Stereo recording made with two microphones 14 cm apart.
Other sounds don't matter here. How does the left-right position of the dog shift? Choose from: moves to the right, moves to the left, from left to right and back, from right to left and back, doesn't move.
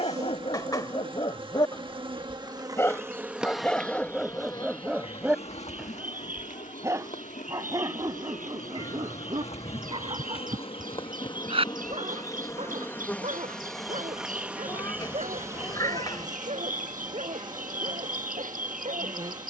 moves to the right.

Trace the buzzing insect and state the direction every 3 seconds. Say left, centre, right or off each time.
right, left, left, left, centre, right, right.